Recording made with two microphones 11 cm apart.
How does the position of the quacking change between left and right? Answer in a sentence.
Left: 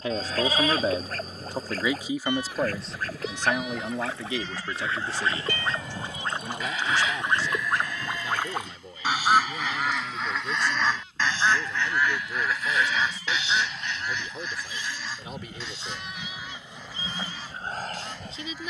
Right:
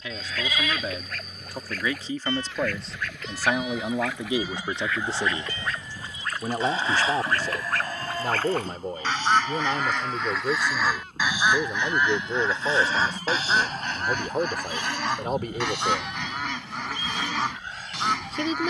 In this clip you hear the quacking move to the right.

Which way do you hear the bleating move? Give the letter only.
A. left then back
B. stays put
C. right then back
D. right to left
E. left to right
C.